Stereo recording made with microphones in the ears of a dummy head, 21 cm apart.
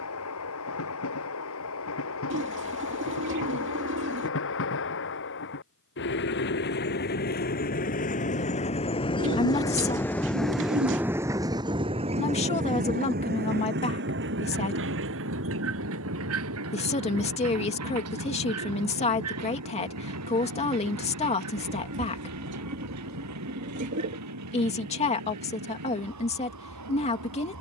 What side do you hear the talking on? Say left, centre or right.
left.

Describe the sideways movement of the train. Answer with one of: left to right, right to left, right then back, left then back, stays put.
left to right.